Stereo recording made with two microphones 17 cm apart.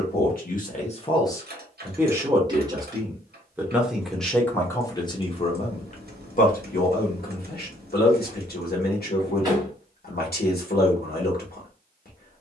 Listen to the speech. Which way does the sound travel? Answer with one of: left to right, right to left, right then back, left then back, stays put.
right then back.